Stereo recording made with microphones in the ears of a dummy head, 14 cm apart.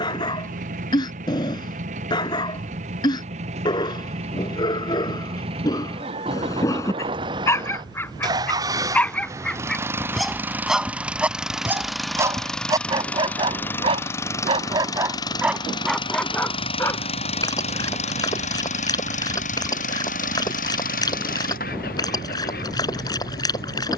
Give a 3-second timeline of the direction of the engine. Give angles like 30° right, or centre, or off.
50° right, 40° right, 30° right, 10° right, 10° left, 30° left, 50° left, 60° left.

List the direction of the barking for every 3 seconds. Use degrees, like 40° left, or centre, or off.
30° left, 30° left, 20° left, centre, 30° right, 10° left, 20° left, 20° left.